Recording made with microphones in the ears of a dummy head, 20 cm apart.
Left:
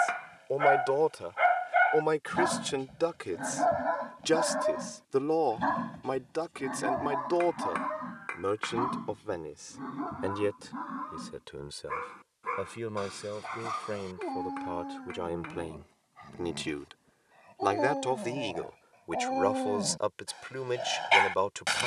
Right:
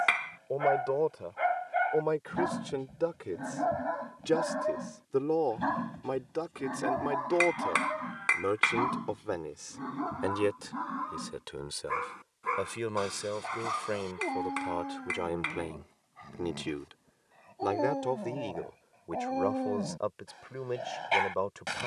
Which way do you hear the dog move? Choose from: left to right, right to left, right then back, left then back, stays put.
right then back.